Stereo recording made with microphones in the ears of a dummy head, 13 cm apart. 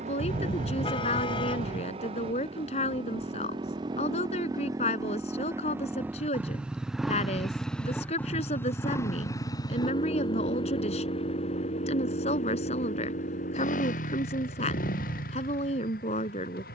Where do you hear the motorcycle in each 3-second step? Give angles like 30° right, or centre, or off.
40° right, 30° right, centre, 30° left, 50° left, 60° left.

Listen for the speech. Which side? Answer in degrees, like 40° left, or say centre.
50° left.